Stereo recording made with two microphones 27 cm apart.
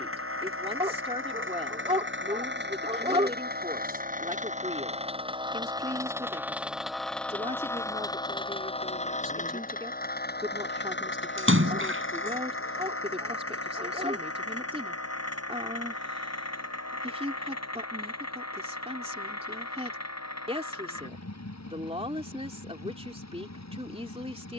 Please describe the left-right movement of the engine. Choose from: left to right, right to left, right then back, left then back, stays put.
right to left.